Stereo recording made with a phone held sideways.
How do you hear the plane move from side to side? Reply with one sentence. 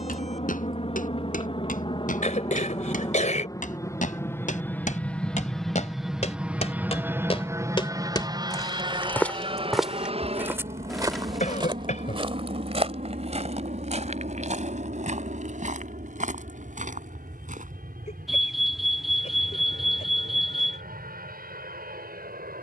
You can hear the plane go from the left side to the right.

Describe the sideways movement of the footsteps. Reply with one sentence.
You can hear the footsteps go from the left side to the right.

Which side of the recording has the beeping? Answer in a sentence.
In this clip you hear the beeping in the centre.